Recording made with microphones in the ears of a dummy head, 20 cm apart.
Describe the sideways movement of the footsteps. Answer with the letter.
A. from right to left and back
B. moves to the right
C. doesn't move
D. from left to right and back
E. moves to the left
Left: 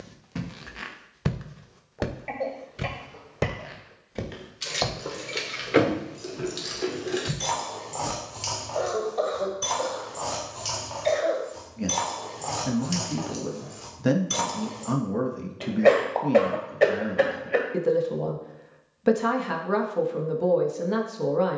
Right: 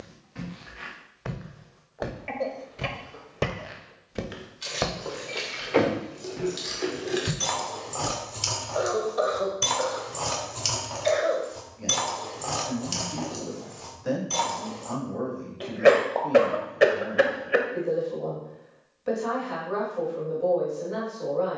B.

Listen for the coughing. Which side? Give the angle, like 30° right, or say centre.
10° right.